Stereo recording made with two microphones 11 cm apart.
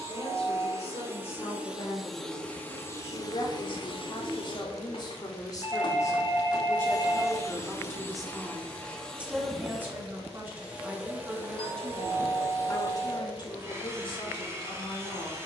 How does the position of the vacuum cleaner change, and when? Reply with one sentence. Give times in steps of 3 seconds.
You can hear the vacuum cleaner in the centre from 0 s, on the left from 3 s, in the centre from 9 s and on the right from 12 s.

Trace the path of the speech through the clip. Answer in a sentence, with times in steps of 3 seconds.
You can hear the speech on the left from 0 s, in the centre from 6 s and on the left from 12 s.